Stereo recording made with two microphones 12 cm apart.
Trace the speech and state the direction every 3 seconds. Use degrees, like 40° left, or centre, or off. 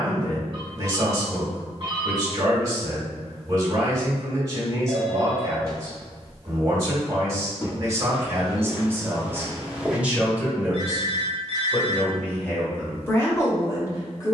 30° right, 30° right, 30° right, 10° right, 20° left.